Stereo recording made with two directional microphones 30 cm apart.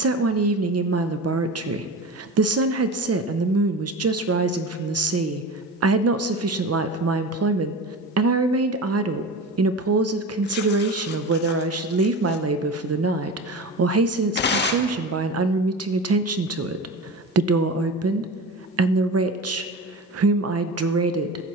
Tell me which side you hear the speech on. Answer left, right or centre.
right.